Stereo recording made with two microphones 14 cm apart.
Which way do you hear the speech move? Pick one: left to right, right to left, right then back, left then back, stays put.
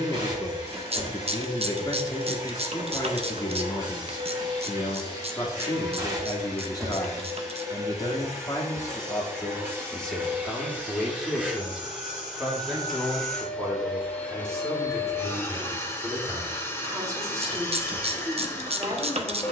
left to right.